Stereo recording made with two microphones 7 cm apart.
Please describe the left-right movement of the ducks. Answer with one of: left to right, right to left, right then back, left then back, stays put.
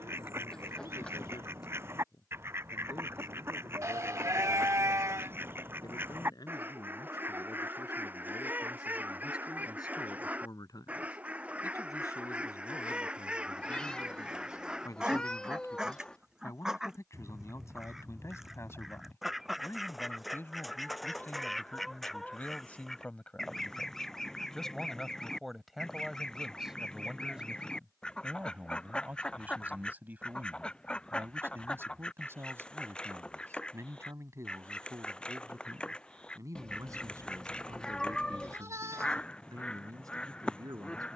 right to left.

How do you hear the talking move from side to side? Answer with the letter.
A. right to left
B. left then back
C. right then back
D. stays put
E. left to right
E.